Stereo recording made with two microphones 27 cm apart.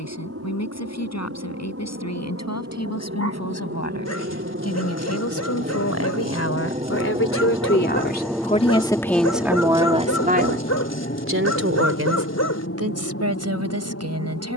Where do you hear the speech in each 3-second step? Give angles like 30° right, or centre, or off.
80° left, 70° left, 40° left, 30° right, 70° right.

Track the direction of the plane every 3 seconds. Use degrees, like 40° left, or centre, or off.
60° right, 50° right, 20° right, 30° left, 50° left.